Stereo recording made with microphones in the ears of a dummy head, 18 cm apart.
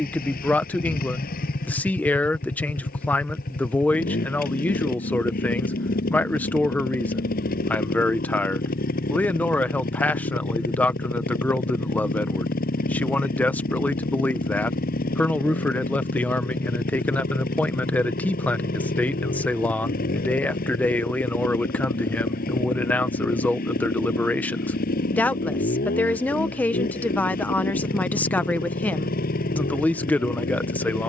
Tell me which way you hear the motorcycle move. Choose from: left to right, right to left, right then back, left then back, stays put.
stays put.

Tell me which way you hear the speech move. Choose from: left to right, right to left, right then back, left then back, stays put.
stays put.